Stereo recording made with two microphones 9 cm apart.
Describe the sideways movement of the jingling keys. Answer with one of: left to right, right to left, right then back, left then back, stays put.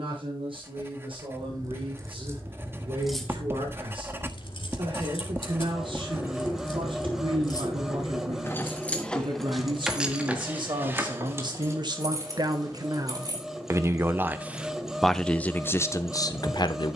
left then back.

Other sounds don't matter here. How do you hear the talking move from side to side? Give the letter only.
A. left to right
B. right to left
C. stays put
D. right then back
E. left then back
B.